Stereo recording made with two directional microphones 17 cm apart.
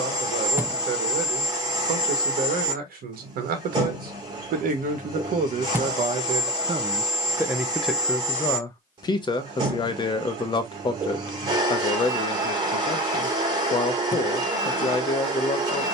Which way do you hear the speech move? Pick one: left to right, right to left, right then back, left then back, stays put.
right to left.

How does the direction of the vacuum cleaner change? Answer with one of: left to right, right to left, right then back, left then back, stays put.
stays put.